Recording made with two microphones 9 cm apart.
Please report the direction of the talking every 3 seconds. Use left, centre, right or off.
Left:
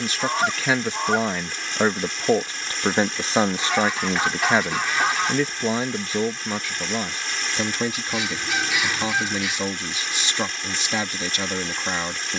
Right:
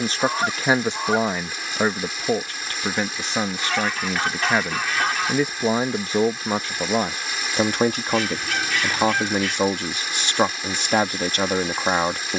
centre, centre, right, right.